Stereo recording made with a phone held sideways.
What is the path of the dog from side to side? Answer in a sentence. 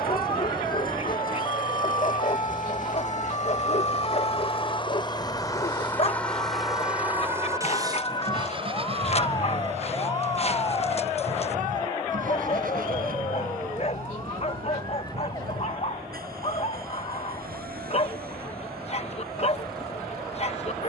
You can hear the dog stay put.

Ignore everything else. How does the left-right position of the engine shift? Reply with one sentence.
You can hear the engine go from the left side to the right.